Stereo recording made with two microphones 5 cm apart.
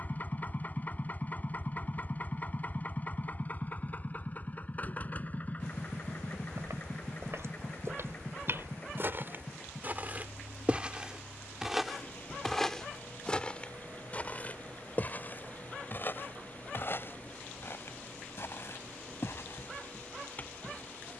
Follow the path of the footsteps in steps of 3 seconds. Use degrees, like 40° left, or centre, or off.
off, off, 60° right, 30° right, 20° left, 50° left, 60° left.